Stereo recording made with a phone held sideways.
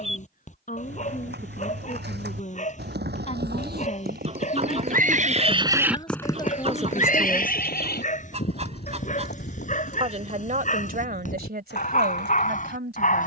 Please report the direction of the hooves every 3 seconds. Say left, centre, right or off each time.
right, right, left, left, left.